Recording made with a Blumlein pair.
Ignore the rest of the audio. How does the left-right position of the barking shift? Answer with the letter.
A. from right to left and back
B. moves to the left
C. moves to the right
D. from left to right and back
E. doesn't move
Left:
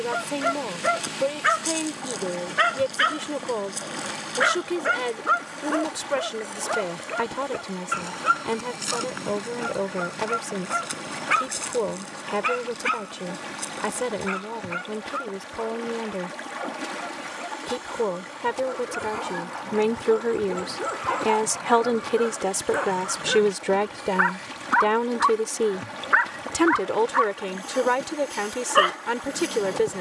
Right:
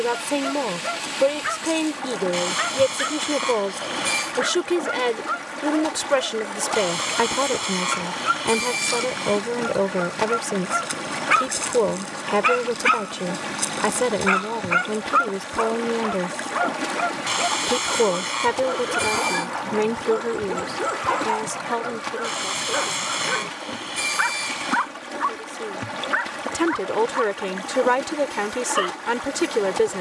D.